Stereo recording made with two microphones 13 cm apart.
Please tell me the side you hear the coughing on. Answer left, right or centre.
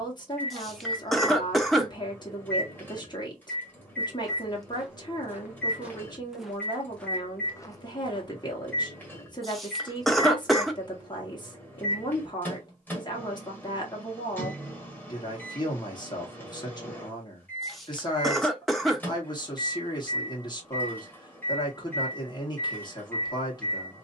centre.